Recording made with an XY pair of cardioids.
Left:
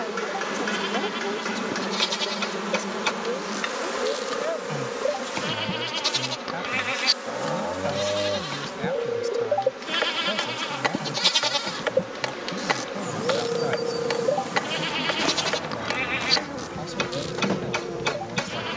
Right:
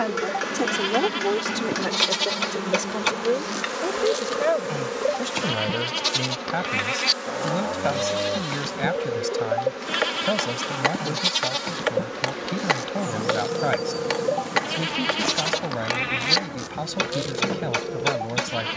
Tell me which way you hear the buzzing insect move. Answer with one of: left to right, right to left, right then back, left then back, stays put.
right then back.